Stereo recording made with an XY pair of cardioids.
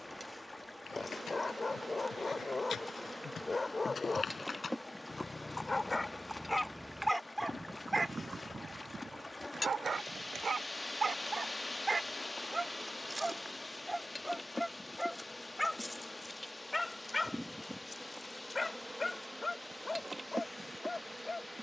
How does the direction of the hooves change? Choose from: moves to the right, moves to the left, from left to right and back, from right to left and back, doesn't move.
moves to the right.